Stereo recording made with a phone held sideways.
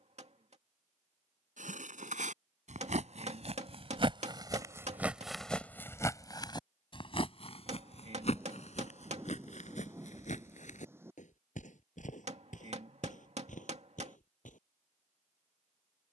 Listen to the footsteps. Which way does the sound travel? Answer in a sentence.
You can hear the footsteps move from right to left.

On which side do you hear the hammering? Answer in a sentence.
You can hear the hammering on the right.